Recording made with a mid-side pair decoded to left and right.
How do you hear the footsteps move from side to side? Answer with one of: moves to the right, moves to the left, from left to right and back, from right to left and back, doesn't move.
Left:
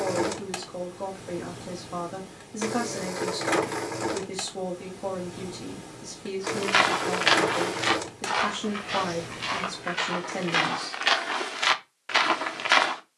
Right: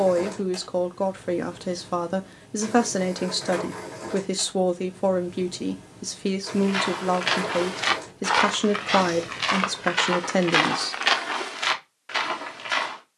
from left to right and back.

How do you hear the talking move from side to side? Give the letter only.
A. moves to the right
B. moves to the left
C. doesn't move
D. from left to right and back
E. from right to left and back
C.